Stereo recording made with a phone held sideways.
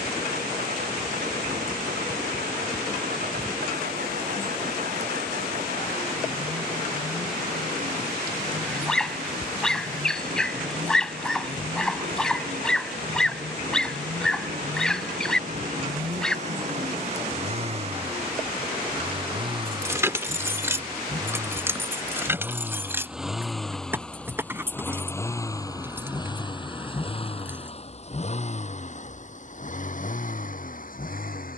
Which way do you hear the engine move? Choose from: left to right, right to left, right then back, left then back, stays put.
right to left.